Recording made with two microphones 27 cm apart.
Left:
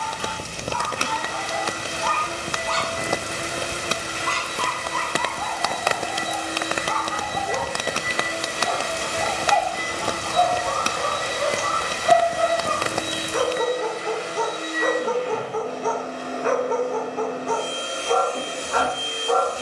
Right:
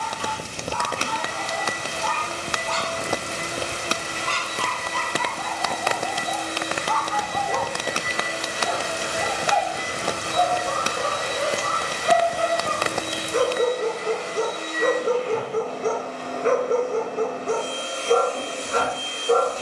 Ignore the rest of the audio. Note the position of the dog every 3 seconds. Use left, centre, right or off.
left, left, left, right, right, right, right.